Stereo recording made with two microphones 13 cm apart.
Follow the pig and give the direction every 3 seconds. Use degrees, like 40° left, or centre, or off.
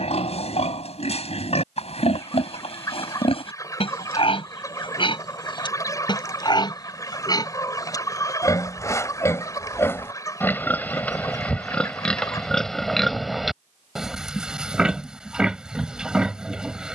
50° left, 40° left, 30° left, 10° left, centre, 10° right.